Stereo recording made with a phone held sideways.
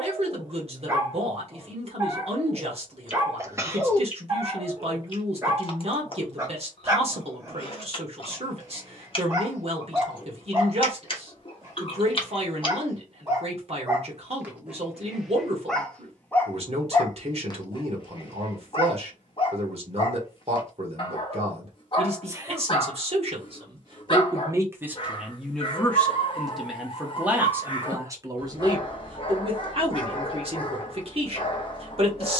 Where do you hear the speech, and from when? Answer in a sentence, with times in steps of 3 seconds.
In this clip you hear the speech on the right from 0 s, in the centre from 24 s and on the right from 27 s.